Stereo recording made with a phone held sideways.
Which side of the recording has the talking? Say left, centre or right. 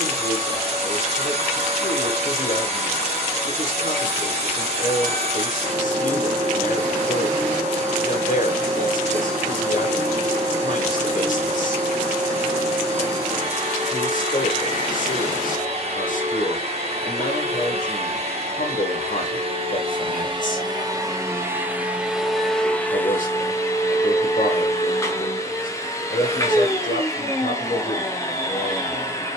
left.